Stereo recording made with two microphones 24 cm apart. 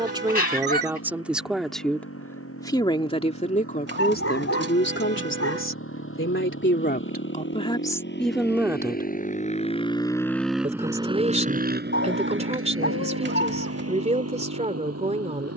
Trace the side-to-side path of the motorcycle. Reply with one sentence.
You can hear the motorcycle move to the right.